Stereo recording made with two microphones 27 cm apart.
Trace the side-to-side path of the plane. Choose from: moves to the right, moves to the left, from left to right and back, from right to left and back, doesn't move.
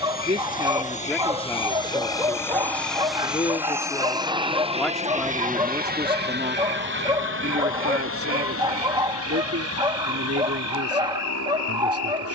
moves to the right.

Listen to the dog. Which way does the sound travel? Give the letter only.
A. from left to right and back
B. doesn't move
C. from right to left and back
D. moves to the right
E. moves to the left
B.